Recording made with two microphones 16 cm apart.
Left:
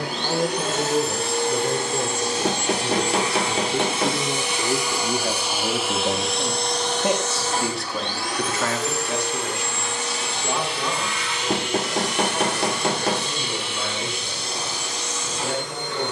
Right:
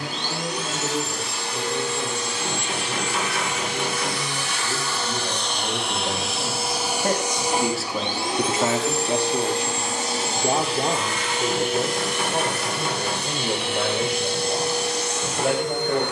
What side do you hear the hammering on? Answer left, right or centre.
left.